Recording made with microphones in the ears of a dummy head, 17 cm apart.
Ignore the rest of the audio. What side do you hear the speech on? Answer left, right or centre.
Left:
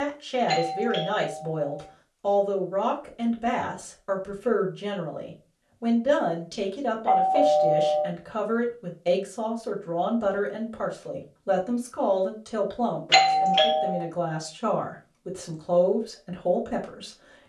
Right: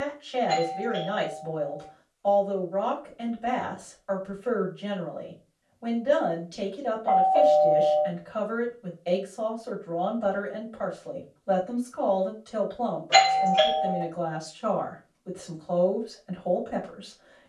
left.